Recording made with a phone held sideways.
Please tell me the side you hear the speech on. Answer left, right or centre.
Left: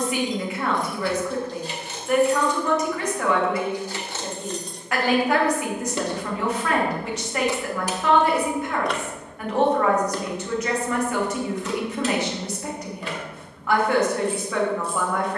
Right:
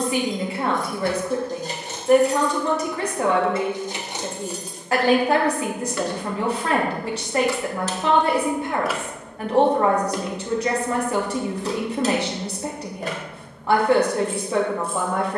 right.